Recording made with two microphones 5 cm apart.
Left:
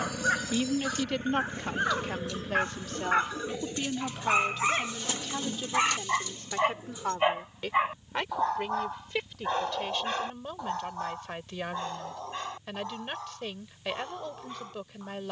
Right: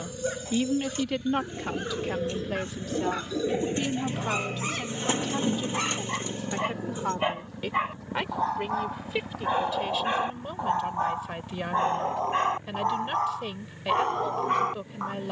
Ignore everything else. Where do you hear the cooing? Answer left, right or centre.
right.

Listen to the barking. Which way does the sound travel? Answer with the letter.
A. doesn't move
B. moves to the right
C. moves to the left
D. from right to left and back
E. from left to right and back
B.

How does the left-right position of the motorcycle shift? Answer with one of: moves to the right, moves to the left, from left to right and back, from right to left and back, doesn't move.
moves to the right.